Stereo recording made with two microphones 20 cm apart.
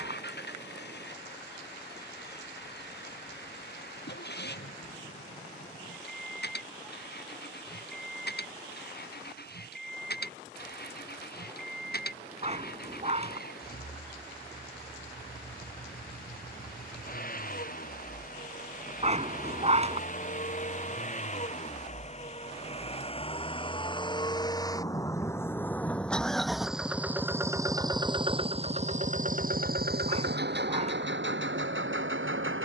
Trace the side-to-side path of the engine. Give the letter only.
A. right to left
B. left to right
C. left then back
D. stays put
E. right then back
B.